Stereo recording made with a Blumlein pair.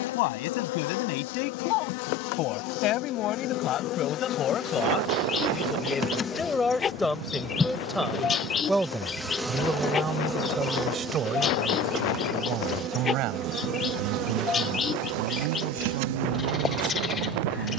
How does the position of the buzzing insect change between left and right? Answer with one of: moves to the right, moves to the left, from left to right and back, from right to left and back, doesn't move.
moves to the right.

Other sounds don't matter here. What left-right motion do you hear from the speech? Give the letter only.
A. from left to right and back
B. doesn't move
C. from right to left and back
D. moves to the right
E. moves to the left
D.